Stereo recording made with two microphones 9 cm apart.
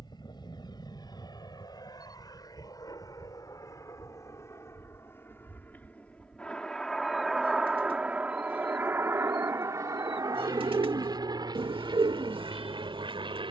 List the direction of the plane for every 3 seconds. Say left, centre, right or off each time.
left, left, centre, right, right.